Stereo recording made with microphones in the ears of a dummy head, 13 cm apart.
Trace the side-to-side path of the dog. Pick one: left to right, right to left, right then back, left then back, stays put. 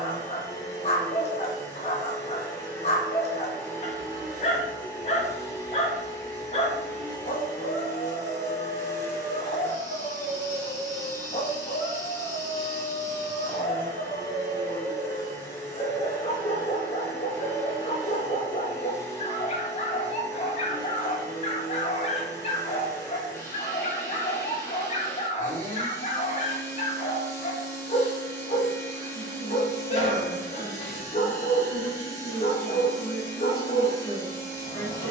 stays put.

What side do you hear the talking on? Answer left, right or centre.
left.